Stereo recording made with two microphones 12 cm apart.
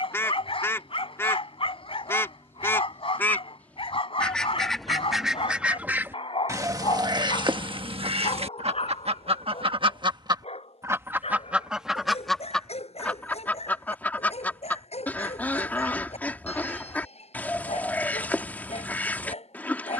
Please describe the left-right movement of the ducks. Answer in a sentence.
You can hear the ducks move from left to right and back again.